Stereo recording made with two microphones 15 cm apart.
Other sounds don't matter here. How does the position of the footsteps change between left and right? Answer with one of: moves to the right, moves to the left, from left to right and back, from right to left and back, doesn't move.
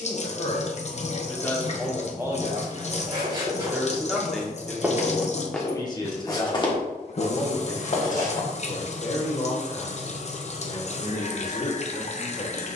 moves to the left.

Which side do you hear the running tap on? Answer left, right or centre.
left.